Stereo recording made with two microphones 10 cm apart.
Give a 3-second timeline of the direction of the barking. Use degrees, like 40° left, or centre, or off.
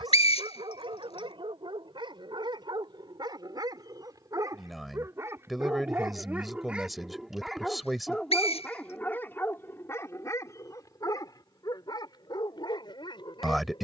50° right, 30° right, centre, 30° left, 50° left.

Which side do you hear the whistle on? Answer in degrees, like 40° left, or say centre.
80° left.